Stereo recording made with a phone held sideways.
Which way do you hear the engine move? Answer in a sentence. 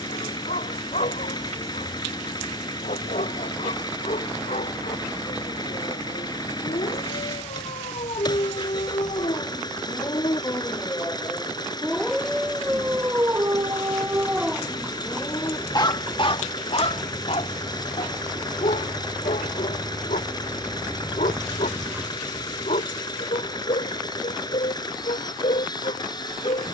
You can hear the engine stay put.